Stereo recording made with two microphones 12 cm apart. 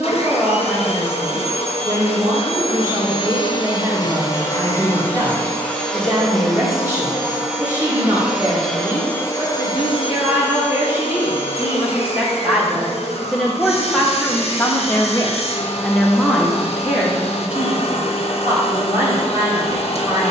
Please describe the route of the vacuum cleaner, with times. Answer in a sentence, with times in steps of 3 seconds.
In this clip you hear the vacuum cleaner on the left from 0 s, in the centre from 6 s and on the left from 9 s.